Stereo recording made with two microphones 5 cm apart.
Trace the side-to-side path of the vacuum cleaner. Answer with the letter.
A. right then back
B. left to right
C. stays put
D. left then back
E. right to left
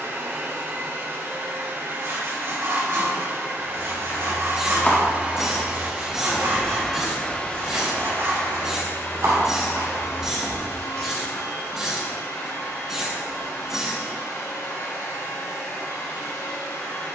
E.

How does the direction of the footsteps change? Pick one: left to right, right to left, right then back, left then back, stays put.
left to right.